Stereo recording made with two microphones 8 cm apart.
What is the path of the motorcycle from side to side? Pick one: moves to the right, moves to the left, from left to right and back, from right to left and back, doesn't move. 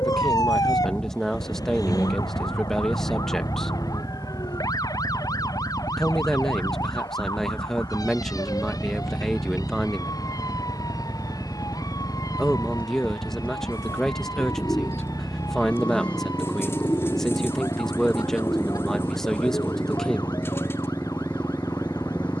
doesn't move.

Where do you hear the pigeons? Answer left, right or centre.
left.